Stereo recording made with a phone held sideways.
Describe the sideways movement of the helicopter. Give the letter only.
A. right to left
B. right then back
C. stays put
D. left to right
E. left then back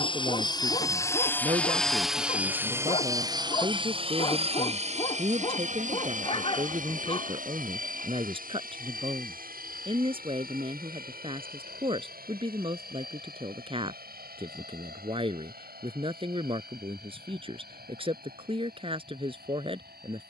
D.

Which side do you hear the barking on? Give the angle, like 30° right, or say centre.
40° left.